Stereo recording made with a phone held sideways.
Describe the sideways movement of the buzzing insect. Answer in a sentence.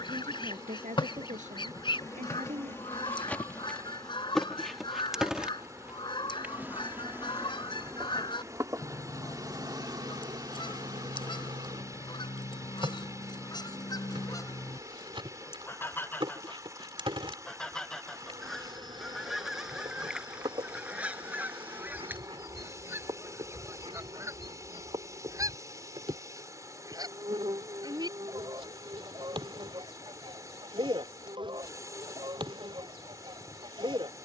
In this clip you hear the buzzing insect travel towards the right.